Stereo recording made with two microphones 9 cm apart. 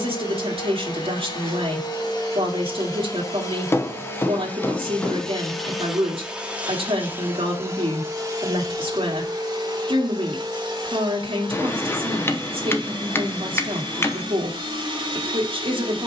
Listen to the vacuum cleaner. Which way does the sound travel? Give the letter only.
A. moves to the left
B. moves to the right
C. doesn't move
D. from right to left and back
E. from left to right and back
B.